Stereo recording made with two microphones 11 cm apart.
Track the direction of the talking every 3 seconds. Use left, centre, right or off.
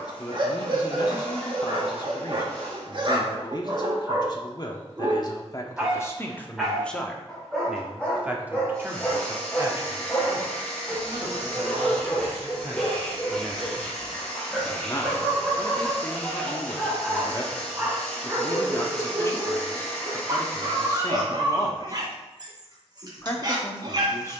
left, left, centre, right, centre, left, left, left.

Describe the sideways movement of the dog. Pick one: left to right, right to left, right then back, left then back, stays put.
left then back.